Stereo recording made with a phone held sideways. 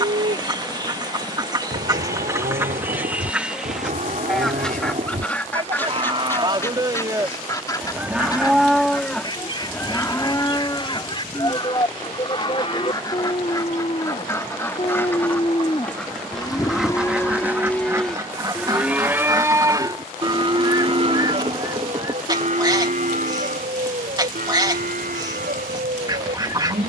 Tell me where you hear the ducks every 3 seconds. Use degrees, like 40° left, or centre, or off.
20° right, centre, 20° left, 30° left, 20° left, centre, 20° right, 20° right, 20° right.